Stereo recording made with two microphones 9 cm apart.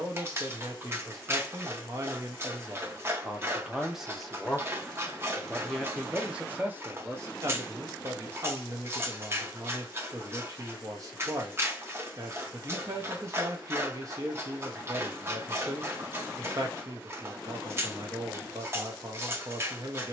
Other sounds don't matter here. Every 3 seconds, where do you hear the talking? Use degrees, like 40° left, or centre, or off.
40° right, centre, 30° right, 40° right, 40° right, 40° right, 40° right.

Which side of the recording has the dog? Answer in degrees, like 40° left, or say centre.
30° right.